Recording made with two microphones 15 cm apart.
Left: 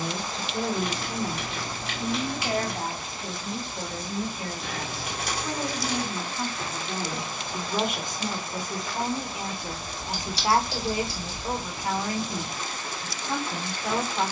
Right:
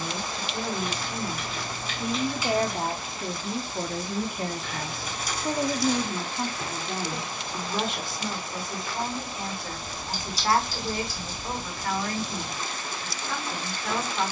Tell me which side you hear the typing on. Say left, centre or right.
left.